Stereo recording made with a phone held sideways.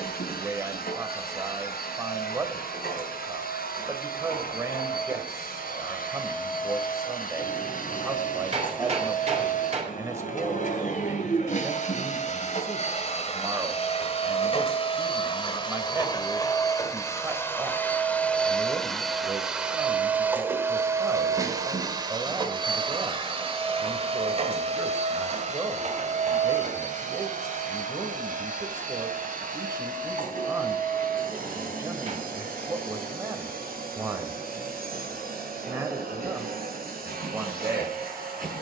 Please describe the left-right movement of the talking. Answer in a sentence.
In this clip you hear the talking stay in one place.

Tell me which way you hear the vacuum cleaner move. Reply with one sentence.
You can hear the vacuum cleaner move from left to right.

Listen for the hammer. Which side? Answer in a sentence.
You can hear the hammer on the right.